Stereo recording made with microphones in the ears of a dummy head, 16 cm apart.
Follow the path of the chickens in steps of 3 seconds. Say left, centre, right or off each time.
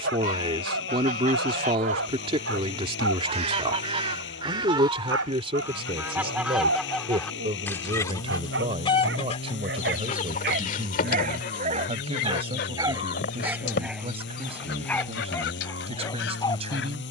right, right, centre, left, left, left.